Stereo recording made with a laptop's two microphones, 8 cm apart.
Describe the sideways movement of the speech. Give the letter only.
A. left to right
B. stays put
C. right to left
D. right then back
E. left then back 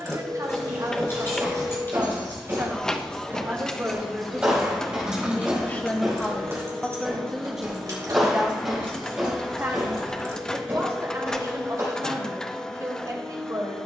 E.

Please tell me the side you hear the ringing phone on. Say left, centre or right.
right.